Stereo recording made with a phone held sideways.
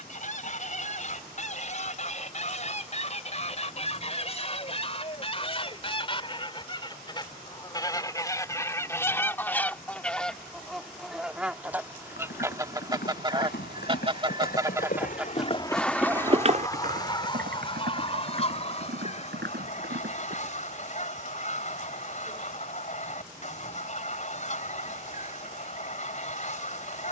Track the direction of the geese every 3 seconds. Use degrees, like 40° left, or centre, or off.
50° left, 40° left, 30° left, centre, 20° right, 20° left, 40° left, 50° left, 50° left.